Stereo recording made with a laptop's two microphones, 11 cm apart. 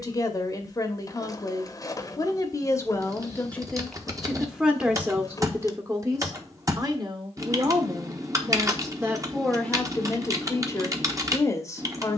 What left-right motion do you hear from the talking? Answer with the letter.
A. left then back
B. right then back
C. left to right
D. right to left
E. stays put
B.